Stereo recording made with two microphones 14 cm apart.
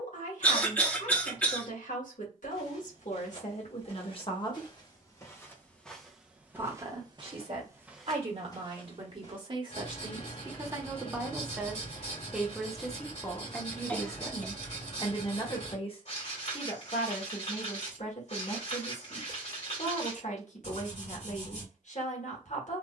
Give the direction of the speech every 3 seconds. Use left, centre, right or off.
left, left, right, right, centre, left, left, left.